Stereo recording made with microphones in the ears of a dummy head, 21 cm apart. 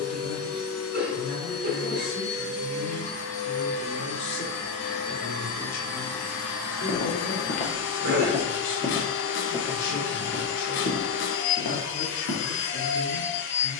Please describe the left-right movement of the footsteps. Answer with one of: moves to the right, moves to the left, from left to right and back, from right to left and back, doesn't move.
from left to right and back.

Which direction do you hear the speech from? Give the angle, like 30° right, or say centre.
60° left.